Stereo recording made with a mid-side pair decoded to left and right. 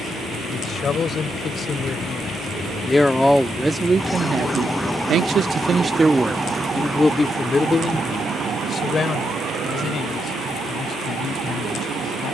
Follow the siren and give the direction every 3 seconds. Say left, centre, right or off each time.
left, centre, right, right.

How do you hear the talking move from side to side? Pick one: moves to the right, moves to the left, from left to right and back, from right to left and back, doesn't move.
from left to right and back.